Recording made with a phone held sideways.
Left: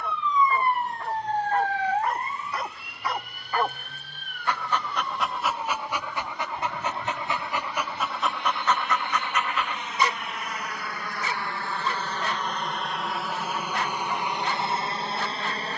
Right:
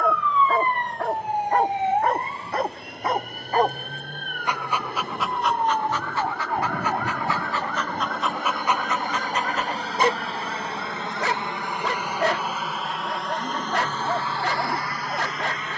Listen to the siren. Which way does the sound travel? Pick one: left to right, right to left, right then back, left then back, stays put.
left to right.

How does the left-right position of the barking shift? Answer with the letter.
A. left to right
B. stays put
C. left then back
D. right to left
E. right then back
C.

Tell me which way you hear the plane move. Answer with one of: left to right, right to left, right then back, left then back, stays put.
right to left.